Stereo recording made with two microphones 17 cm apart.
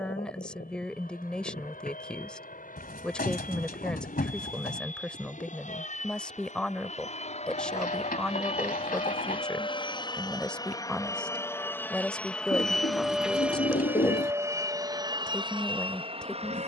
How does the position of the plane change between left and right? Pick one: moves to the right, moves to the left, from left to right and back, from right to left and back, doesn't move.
moves to the right.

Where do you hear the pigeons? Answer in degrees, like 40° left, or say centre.
60° left.